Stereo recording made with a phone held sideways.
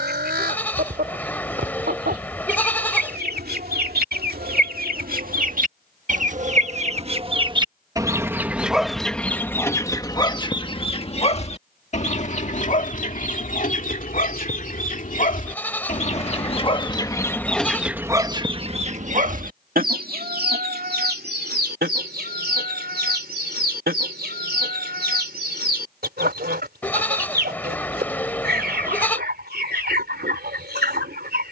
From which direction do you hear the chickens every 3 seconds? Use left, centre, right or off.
right, right, right, left, left, left, right, right, right, right, right.